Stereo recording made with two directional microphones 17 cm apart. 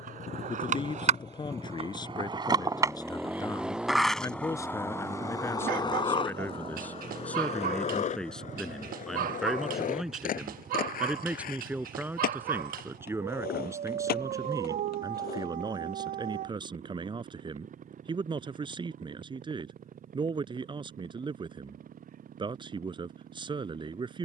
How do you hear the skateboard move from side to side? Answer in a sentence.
In this clip you hear the skateboard move from right to left.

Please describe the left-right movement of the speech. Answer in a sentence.
You can hear the speech go from the left side to the right.